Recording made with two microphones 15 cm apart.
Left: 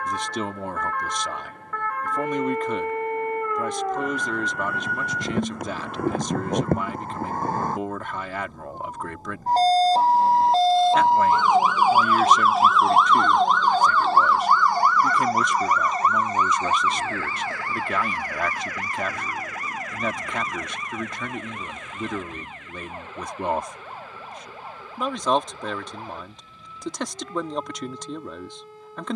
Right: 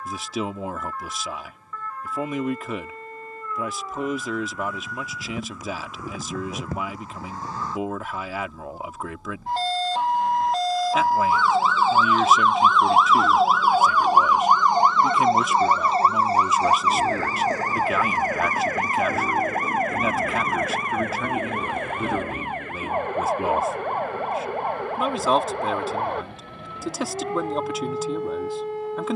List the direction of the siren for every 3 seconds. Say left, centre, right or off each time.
left, left, left, left, centre, right, right, right, right, right.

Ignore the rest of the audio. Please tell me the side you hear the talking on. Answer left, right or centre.
centre.